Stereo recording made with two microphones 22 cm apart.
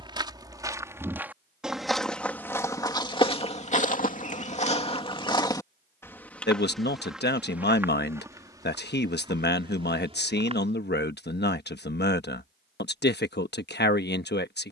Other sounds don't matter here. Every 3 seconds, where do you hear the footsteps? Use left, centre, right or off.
centre, left, centre, right, off.